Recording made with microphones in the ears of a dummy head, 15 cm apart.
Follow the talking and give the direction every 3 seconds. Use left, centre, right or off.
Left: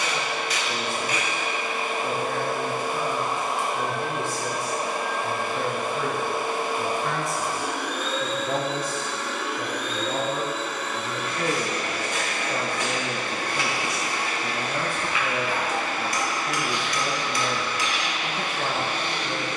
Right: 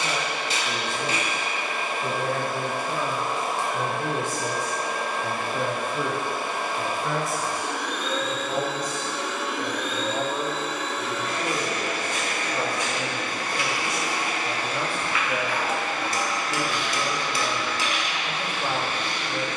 right, right, centre, left, left, left, left.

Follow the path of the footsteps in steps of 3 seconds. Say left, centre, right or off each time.
off, off, off, left, left, centre, right.